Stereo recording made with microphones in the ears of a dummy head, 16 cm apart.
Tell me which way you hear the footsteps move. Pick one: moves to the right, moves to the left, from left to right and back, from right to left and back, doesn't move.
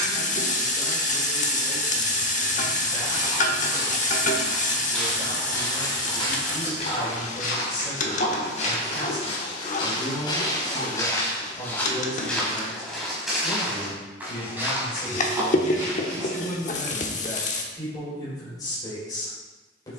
from right to left and back.